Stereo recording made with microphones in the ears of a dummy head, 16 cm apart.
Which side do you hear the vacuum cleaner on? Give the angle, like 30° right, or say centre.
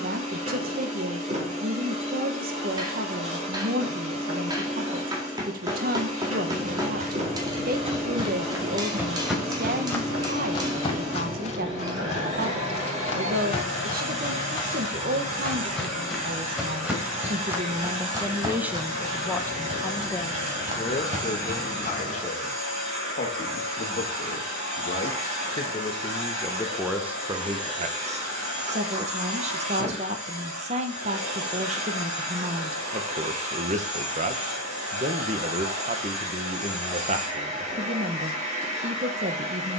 40° right.